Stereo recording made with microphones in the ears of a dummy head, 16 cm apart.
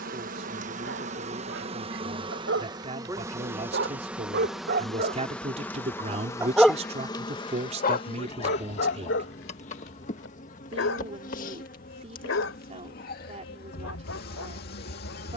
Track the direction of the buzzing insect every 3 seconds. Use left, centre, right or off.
right, centre, left, left, left.